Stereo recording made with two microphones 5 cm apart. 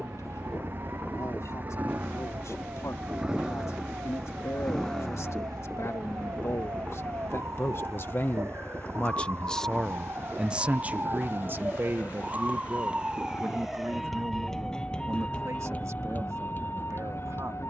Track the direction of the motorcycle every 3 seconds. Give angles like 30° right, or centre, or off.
40° right, centre, 30° left, 50° left, 50° left, 60° left.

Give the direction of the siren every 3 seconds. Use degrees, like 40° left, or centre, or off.
80° right, 70° right, 60° right, 50° right, 10° right, 40° left.